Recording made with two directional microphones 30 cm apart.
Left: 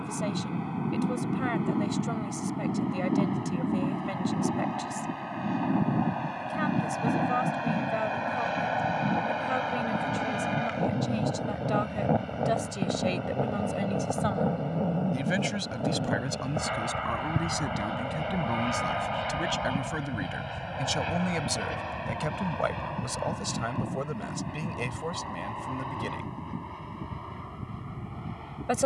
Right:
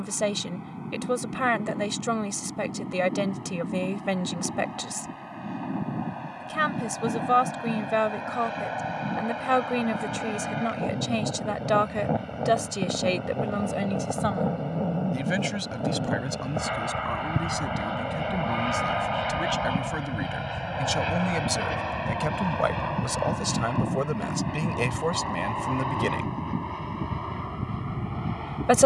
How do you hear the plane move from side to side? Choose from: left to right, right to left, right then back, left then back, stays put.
left to right.